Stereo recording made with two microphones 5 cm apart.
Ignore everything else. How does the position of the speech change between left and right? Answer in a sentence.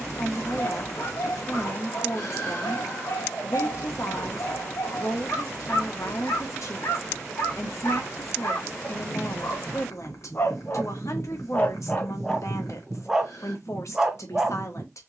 In this clip you hear the speech stay put.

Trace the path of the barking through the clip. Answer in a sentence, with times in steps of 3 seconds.
You can hear the barking on the left from 0 s and in the centre from 12 s.